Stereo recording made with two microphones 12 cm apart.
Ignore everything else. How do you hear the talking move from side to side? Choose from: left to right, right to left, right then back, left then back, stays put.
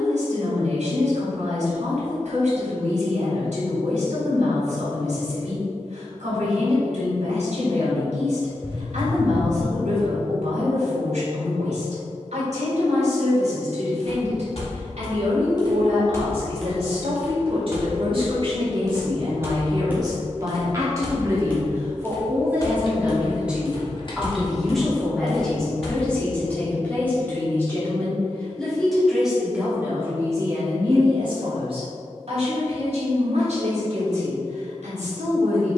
left then back.